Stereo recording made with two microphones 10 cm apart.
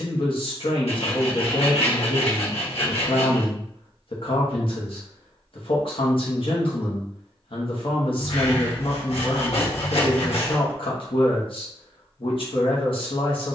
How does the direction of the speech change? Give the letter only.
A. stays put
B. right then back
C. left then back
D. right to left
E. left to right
A.